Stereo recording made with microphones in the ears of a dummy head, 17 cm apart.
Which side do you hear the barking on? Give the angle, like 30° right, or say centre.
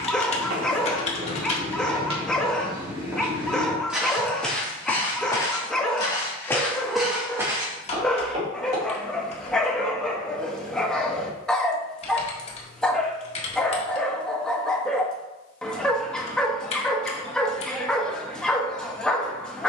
centre.